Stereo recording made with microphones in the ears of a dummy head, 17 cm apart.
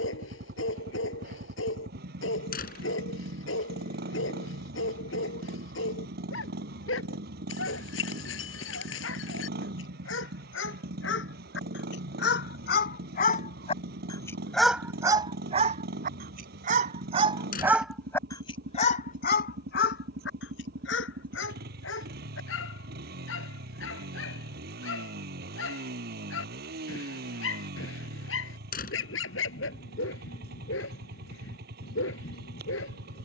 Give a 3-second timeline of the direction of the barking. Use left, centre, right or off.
left, left, left, left, left, right, left, left, left, left, left.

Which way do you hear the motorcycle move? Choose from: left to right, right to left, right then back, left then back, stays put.
stays put.